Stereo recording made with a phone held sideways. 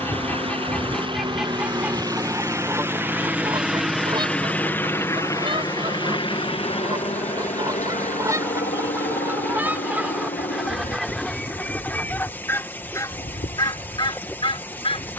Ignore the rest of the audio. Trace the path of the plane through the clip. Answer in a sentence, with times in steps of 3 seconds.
In this clip you hear the plane on the right from 0 s, in the centre from 3 s and on the left from 6 s.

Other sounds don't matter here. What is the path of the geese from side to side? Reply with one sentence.
In this clip you hear the geese go right and come back.